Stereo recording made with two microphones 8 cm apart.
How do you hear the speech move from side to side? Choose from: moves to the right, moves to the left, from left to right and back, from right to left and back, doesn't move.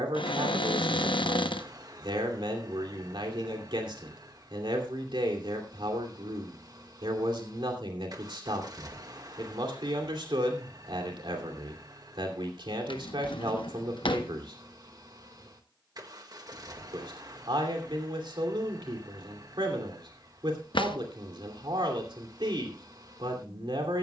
doesn't move.